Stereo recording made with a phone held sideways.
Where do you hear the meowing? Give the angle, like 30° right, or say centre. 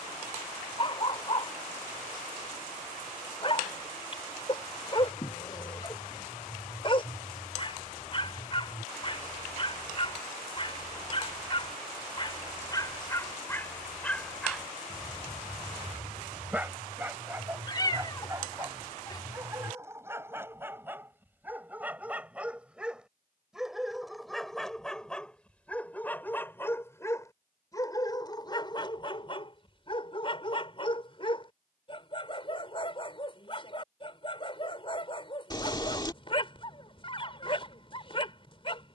30° left.